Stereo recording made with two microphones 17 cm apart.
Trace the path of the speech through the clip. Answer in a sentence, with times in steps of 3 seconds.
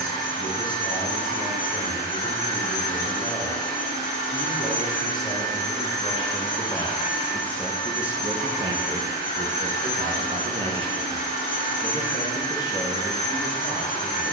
You can hear the speech on the left from 0 s, in the centre from 6 s, on the right from 9 s and on the left from 12 s.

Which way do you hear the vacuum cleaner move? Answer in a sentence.
In this clip you hear the vacuum cleaner stay put.